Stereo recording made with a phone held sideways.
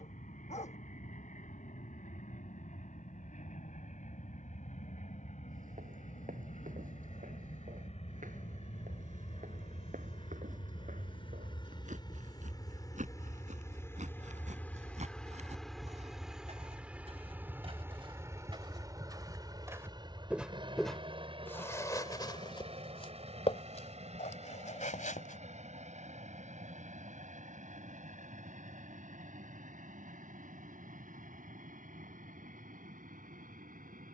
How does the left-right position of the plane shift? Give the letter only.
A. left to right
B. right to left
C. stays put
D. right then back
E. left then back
A.